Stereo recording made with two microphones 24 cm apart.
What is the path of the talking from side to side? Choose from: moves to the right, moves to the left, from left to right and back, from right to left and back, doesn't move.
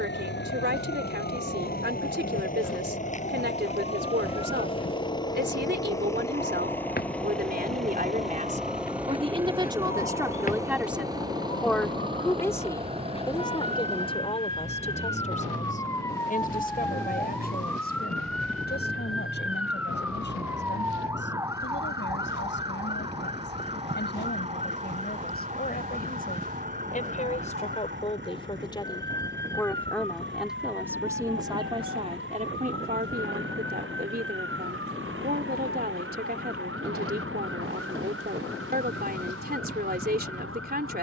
from right to left and back.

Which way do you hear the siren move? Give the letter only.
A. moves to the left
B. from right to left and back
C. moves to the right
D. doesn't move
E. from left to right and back
C.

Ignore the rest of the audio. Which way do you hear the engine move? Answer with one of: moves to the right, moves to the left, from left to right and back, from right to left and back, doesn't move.
moves to the right.